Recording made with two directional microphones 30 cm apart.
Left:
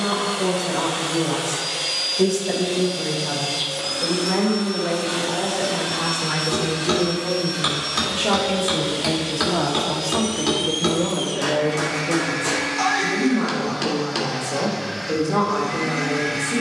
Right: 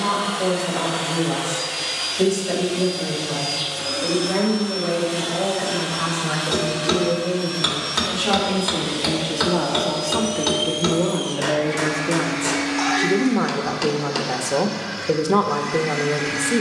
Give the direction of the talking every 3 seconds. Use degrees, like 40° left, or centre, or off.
30° left, 20° left, 10° left, 10° right, 50° right, 50° right.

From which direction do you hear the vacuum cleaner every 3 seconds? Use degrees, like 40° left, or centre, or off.
40° left, 40° left, 30° left, 10° left, 20° right, 30° right.